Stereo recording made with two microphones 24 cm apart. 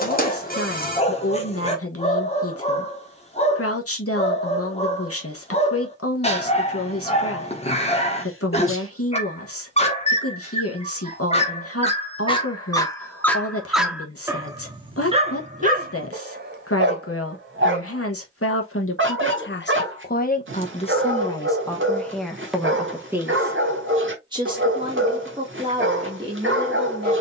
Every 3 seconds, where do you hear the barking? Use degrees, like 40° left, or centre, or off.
30° left, 30° left, 30° left, 30° left, centre, 40° right, 50° right, 50° right, 50° right.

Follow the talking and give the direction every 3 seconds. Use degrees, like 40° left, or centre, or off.
70° left, 70° left, 70° left, 70° left, 70° left, 70° left, 50° left, centre, 20° right.